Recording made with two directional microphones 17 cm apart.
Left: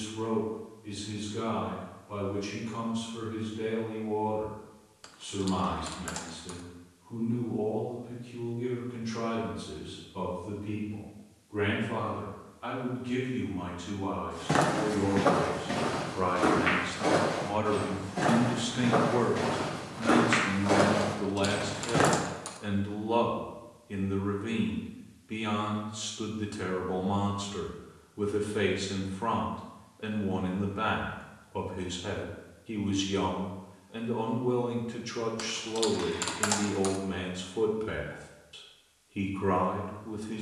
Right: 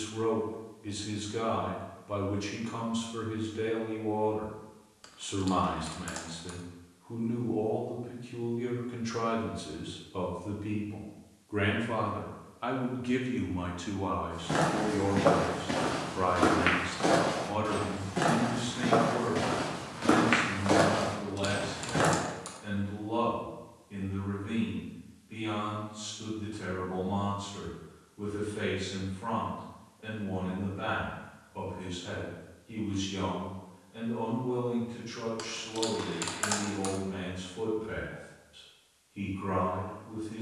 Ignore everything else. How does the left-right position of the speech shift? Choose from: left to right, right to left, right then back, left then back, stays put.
right to left.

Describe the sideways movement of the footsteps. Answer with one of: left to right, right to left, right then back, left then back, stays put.
right then back.